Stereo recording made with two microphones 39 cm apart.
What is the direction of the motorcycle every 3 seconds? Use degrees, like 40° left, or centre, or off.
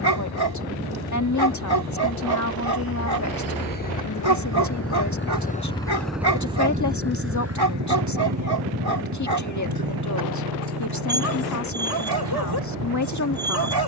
70° left, 40° left, 30° right, 60° right, 70° right.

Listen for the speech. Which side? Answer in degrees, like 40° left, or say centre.
50° left.